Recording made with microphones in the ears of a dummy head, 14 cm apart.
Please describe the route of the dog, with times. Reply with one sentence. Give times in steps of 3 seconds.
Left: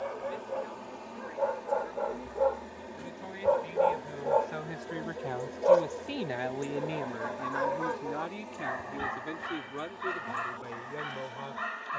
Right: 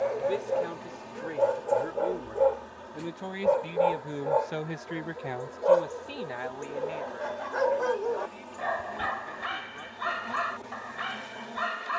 In this clip you hear the dog on the right from 0 s, in the centre from 3 s and on the right from 6 s.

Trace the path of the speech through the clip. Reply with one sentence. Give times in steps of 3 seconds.
You can hear the speech on the right from 0 s and on the left from 6 s.